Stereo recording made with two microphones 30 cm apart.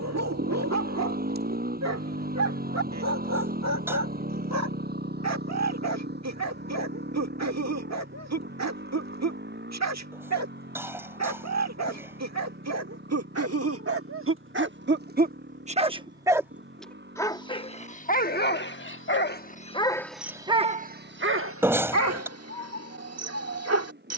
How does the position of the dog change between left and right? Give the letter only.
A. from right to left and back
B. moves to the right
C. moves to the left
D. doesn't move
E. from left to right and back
A.